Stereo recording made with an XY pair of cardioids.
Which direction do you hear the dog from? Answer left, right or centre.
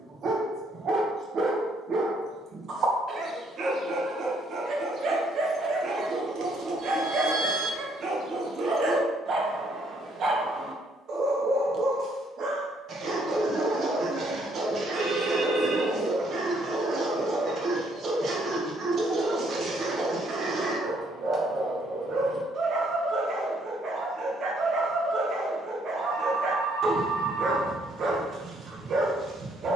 right.